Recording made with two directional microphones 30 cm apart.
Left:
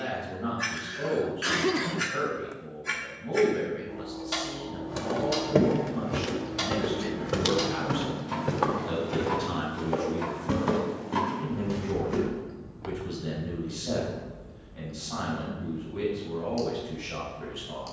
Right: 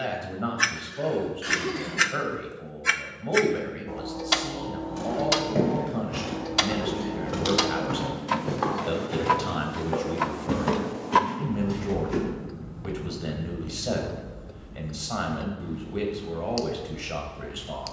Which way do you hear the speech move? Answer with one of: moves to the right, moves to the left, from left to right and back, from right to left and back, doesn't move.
doesn't move.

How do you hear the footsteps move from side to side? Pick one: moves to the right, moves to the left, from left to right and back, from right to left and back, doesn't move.
moves to the right.